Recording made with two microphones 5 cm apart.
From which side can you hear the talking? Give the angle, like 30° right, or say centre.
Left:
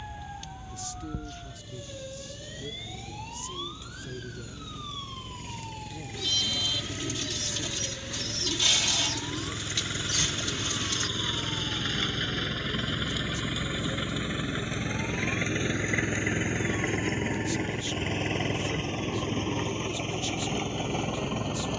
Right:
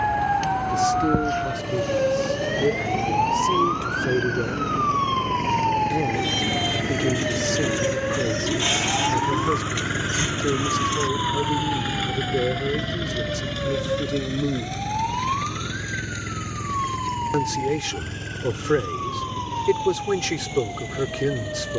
80° right.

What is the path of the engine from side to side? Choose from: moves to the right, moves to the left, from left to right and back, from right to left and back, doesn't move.
moves to the left.